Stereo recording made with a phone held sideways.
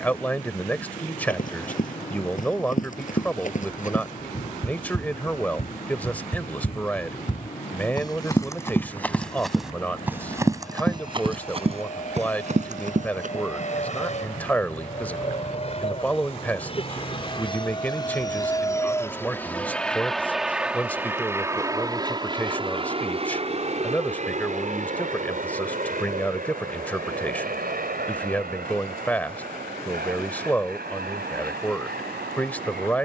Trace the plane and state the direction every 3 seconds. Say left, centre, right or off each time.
left, left, left, left, left, left, centre, right, right, right, right.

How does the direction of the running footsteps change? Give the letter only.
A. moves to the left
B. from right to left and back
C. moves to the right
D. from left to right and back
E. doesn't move
C.